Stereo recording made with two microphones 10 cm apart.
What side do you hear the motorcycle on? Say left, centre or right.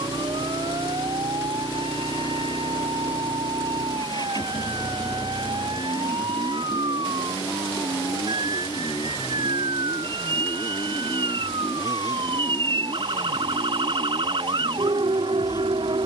left.